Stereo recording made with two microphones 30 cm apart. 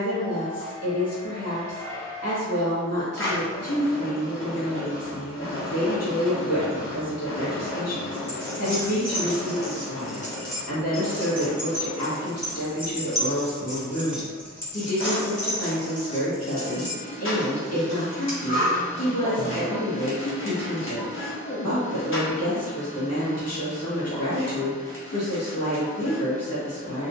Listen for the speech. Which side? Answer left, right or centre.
left.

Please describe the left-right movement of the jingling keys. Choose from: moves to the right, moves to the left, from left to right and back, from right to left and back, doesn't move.
from left to right and back.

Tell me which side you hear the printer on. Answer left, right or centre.
left.